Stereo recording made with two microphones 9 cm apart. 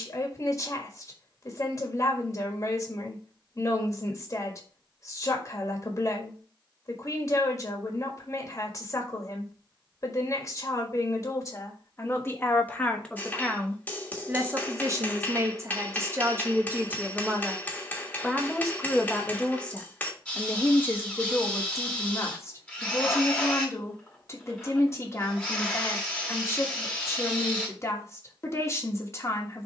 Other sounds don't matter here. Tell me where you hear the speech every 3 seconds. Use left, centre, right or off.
left, left, left, left, centre, right, centre, left, left, left.